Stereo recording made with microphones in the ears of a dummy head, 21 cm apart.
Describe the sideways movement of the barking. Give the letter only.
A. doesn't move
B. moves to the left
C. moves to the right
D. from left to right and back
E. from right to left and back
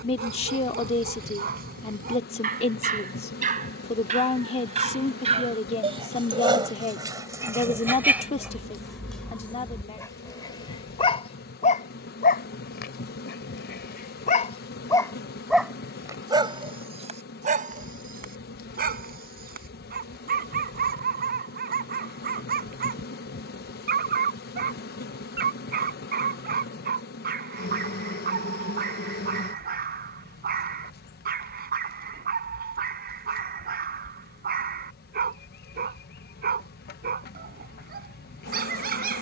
E.